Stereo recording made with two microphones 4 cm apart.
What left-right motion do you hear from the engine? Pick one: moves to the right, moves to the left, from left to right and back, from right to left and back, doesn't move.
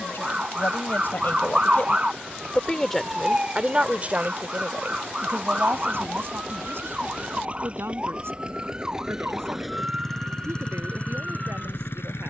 moves to the left.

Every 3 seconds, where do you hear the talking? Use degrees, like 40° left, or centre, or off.
50° left, 40° right, 70° right, 80° right.